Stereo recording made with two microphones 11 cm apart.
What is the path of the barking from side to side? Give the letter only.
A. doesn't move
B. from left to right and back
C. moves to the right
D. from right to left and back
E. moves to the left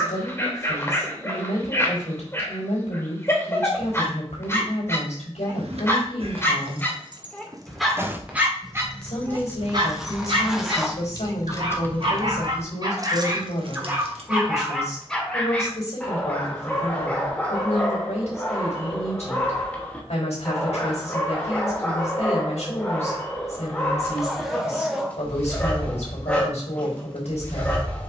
B.